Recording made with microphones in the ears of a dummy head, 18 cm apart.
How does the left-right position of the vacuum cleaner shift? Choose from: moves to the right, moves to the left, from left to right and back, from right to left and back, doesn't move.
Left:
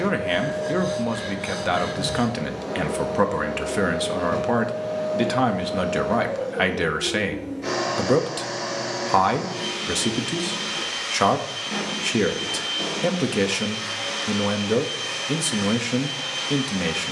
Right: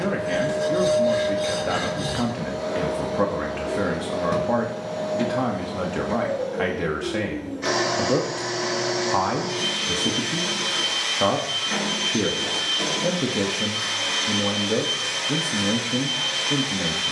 doesn't move.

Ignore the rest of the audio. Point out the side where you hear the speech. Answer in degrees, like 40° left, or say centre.
60° left.